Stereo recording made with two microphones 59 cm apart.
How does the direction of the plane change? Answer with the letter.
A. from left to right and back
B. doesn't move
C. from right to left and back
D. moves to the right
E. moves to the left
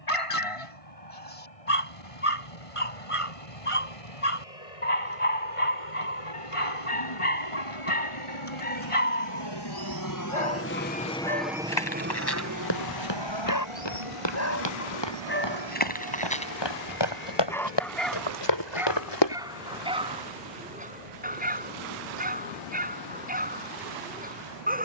D.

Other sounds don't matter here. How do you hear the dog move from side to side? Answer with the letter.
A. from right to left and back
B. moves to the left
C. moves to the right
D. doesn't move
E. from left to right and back
C.